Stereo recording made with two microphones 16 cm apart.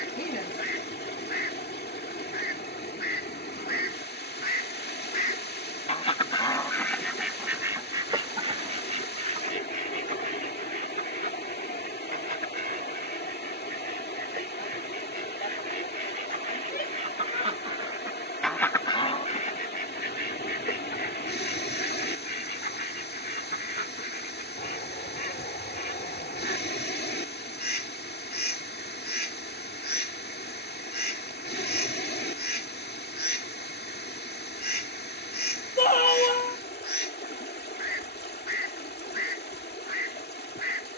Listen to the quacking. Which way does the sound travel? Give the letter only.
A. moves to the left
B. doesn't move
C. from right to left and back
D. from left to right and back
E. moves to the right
D.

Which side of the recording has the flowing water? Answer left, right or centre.
left.